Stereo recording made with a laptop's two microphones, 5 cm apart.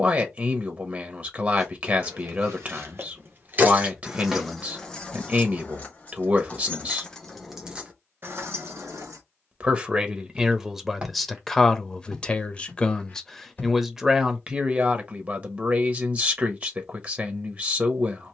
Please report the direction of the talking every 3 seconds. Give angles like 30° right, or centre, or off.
30° right, 30° right, 30° right, 10° right, centre, 30° right.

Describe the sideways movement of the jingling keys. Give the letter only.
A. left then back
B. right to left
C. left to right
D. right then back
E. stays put
A.